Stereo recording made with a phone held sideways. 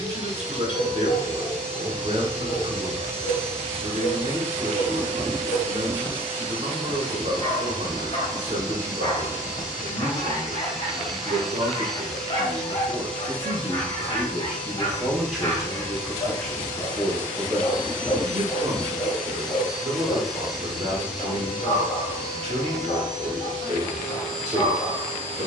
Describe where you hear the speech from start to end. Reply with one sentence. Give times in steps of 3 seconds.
You can hear the speech on the right from 0 s, in the centre from 15 s and on the right from 18 s.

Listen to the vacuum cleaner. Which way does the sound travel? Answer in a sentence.
You can hear the vacuum cleaner move from right to left and back again.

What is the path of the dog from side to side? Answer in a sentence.
You can hear the dog stay in one place.